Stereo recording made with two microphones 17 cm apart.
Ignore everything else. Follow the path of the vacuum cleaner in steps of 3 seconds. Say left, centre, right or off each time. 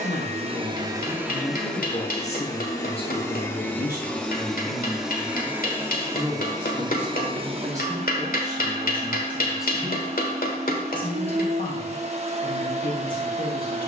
centre, centre, right, right, right.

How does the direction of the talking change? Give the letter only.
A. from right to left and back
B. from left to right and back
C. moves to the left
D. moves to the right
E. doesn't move
B.